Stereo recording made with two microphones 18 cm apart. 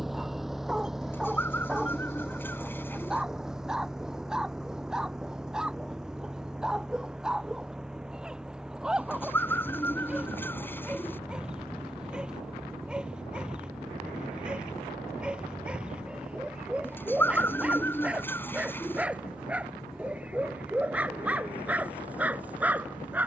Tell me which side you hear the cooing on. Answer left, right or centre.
centre.